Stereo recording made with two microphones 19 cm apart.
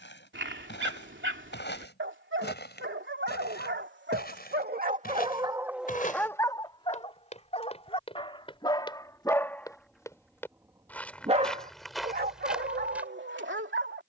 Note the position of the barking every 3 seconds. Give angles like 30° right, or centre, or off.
80° right, 50° right, 20° left, 10° right, 70° right.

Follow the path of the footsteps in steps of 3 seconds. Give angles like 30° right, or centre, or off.
70° left, 50° left, 30° left, 10° left, centre.